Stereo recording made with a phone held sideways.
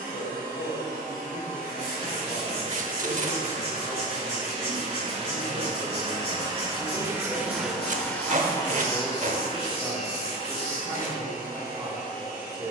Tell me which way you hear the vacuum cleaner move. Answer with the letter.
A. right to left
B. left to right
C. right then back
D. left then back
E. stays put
A.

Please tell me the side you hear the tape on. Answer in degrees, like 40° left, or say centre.
60° right.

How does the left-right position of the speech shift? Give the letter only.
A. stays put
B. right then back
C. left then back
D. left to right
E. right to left
D.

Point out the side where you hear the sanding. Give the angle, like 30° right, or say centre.
40° right.